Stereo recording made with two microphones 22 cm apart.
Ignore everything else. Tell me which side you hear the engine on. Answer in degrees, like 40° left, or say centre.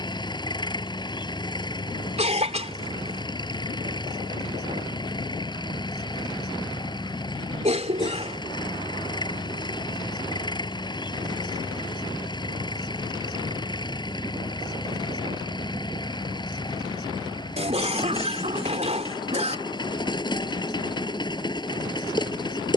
20° left.